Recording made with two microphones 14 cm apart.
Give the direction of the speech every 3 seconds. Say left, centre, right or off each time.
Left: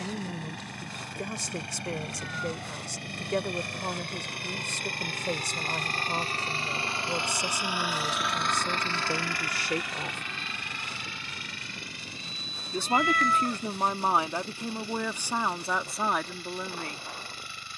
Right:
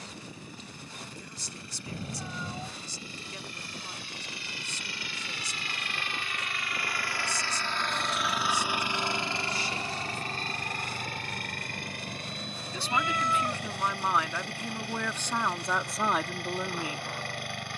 left, left, left, left, left, centre.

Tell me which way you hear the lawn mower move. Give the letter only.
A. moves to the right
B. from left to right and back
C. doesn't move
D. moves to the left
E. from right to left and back
A.